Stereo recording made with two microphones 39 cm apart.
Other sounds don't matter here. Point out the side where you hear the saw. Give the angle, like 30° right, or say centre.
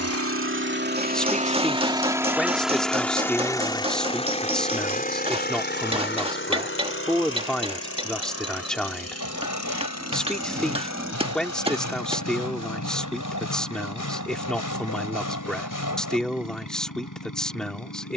50° left.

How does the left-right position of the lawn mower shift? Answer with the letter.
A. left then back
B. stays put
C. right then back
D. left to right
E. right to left
E.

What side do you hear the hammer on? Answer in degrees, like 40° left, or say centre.
10° right.